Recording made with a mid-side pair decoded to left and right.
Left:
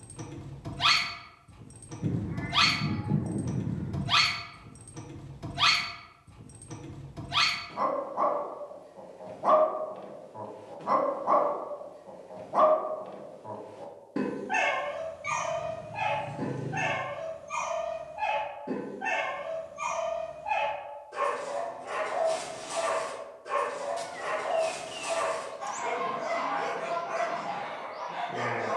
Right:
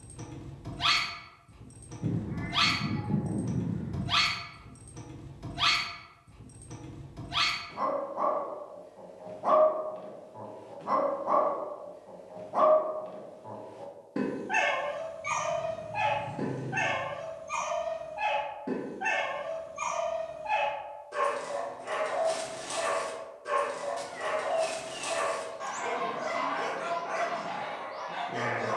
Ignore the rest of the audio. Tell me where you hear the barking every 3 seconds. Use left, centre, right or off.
left, left, left, left, centre, right, right, right, right, right.